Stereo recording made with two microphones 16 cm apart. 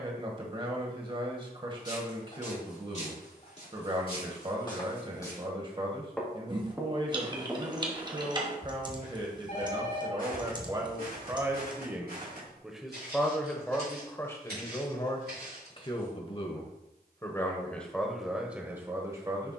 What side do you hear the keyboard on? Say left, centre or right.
right.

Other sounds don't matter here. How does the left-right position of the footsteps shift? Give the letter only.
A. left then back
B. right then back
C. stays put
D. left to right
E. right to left
D.